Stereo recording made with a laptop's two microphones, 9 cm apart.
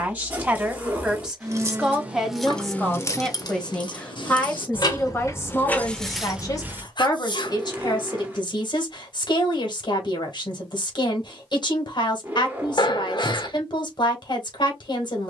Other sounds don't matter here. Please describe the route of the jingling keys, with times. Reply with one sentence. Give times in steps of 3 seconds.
You can hear the jingling keys in the centre from 0 s, on the left from 3 s, in the centre from 6 s and not at all from 9 s.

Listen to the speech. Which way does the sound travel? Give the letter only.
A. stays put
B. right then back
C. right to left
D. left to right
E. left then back
C.